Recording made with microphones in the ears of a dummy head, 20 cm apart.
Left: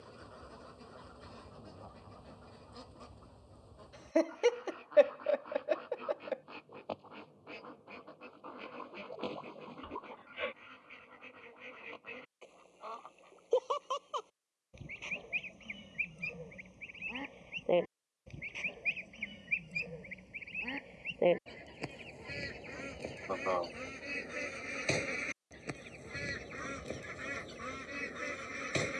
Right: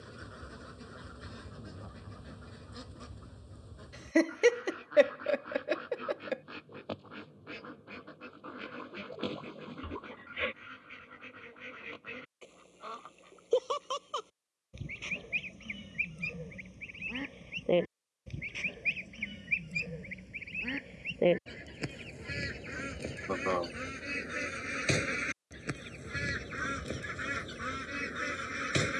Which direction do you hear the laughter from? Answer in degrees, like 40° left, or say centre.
30° right.